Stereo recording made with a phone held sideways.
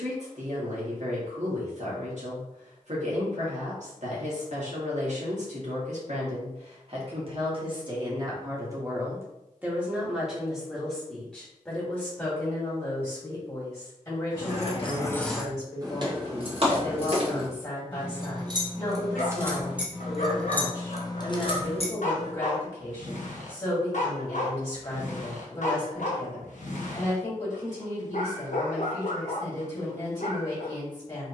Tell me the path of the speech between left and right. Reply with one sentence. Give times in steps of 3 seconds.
In this clip you hear the speech on the right from 0 s, in the centre from 9 s and on the left from 12 s.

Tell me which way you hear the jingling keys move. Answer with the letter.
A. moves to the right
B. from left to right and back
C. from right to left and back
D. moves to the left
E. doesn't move
B.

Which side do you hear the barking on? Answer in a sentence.
In this clip you hear the barking on the left.